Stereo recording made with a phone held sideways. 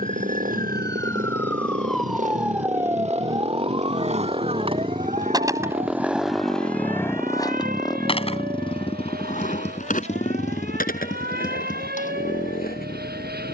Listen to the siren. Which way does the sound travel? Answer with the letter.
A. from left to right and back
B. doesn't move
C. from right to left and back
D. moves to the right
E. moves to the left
D.